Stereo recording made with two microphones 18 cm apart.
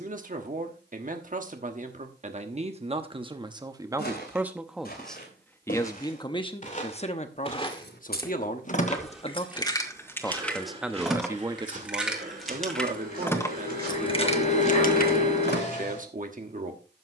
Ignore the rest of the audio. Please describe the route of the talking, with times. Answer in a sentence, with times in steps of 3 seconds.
In this clip you hear the talking on the right from 0 s, in the centre from 3 s, on the left from 6 s, in the centre from 9 s and on the right from 12 s.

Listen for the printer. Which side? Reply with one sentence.
In this clip you hear the printer on the left.